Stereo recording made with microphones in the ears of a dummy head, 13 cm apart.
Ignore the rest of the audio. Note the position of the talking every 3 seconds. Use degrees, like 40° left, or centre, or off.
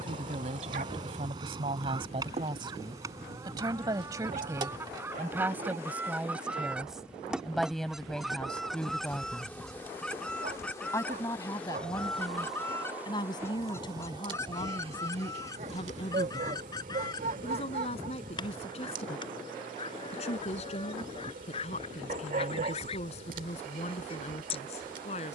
40° right, 20° right, centre, 20° left, 30° left, 40° left, 40° left, 40° left, 40° left.